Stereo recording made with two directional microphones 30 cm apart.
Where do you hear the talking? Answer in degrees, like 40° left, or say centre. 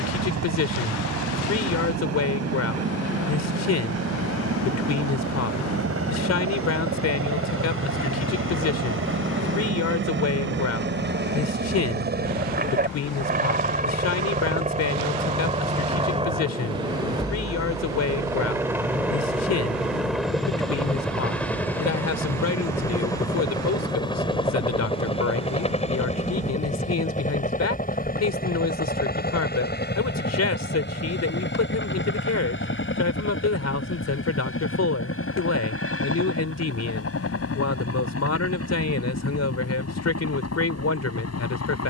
60° left.